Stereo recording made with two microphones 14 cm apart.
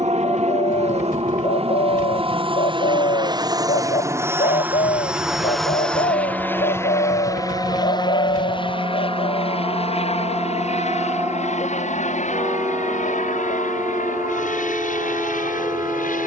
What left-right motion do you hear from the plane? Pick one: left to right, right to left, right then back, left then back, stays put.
right to left.